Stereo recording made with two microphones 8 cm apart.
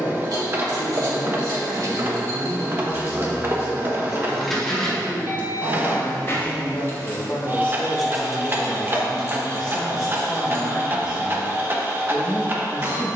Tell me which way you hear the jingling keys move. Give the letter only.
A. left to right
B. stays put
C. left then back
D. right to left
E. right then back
C.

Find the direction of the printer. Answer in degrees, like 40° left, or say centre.
30° right.